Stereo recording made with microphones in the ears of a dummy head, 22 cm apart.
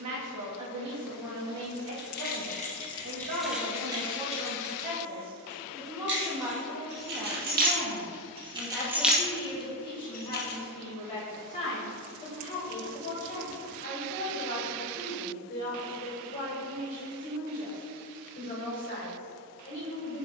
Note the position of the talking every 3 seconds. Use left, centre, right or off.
right, right, centre, left, left, left, left.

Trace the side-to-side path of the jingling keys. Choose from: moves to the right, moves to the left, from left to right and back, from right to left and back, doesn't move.
from left to right and back.